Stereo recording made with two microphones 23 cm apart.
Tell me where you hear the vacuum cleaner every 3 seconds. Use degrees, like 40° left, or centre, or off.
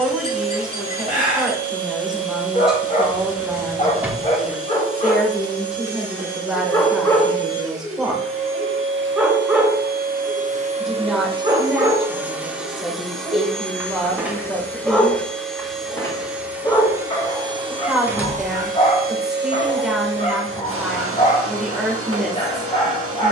70° right, 70° right, 70° right, 30° right, centre, 10° right, 50° right, 70° right.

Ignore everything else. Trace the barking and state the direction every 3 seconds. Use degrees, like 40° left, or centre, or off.
40° left, 30° left, 10° left, 10° right, 10° right, 20° left, 30° left, 30° left.